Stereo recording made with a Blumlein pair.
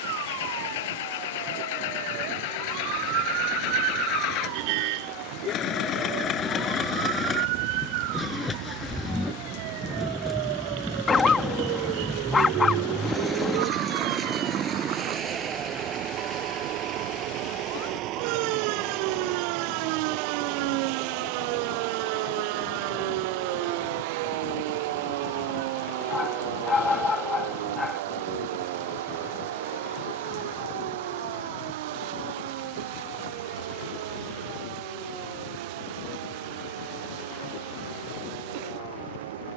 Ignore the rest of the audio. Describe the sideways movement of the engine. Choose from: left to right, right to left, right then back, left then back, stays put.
left to right.